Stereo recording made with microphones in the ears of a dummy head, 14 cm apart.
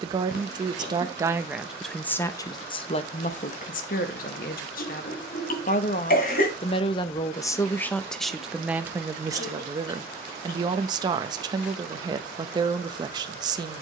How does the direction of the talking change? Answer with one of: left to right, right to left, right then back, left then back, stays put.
left then back.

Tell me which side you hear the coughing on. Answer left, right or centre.
left.